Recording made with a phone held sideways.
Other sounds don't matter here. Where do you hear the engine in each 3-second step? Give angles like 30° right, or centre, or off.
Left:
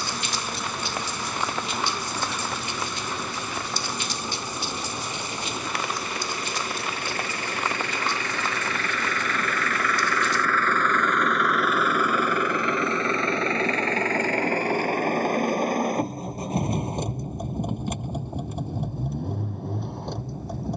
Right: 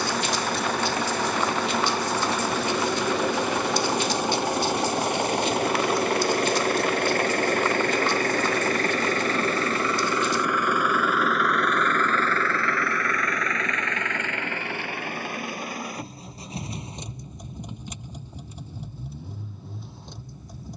80° right, 70° right, 50° right, 20° right, 30° left, 50° left, 60° left.